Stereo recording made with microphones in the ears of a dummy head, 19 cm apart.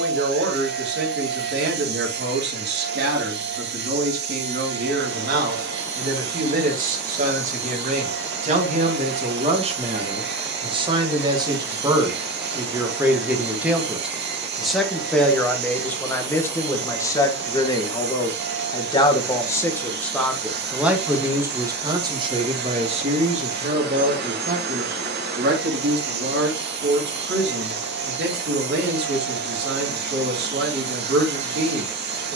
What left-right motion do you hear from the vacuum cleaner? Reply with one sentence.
In this clip you hear the vacuum cleaner stay in one place.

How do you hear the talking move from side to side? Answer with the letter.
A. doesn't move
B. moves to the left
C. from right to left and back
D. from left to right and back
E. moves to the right
C.